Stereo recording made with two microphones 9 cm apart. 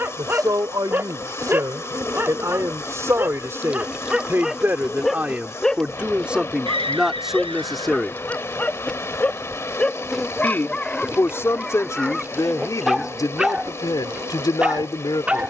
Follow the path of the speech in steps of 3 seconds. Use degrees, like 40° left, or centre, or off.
40° right, 20° right, 10° right, 30° left, 40° left.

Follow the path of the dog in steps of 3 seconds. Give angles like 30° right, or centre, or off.
20° right, 10° right, 20° left, 10° left, centre.